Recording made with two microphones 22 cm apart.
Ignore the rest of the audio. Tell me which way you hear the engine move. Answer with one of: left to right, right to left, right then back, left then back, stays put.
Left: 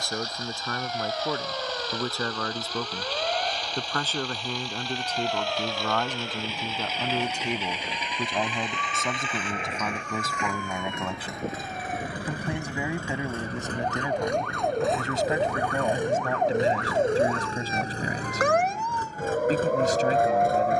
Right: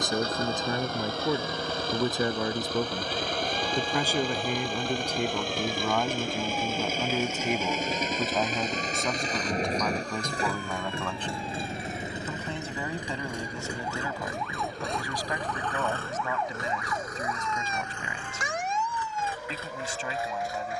right to left.